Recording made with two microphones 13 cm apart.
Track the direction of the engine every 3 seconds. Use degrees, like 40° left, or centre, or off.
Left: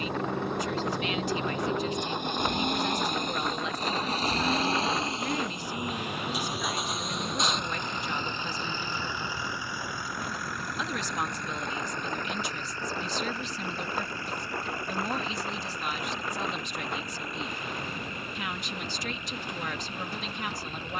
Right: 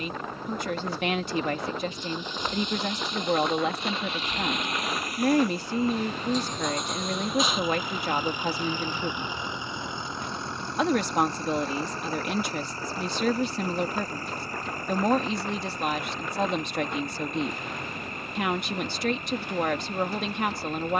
60° left, 30° left, centre, 30° right, 40° right, 50° right, 50° right.